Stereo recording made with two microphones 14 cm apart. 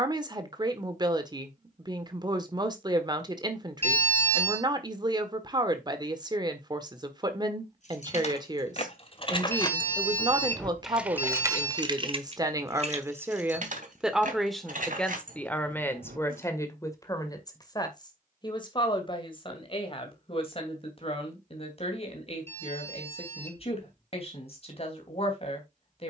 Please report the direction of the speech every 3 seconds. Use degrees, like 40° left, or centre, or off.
30° right, 30° right, 30° right, 30° right, 10° right, 20° left, 40° left, 40° left, 40° left.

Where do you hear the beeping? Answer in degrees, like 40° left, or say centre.
10° left.